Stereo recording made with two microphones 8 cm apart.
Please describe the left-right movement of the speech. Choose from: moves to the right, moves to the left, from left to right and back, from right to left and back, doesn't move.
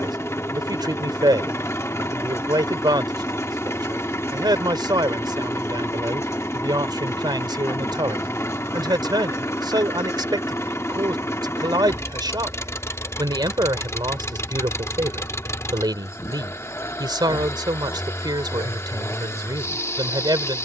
doesn't move.